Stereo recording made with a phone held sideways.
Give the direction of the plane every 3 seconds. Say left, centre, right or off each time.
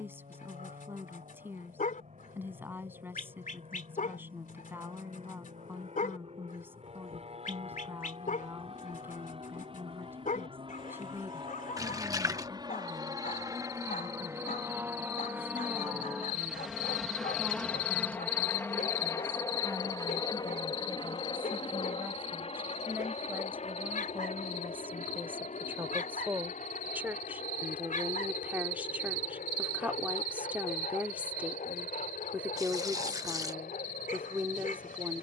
right, right, right, right, right, centre, left, left, left, left, left, left.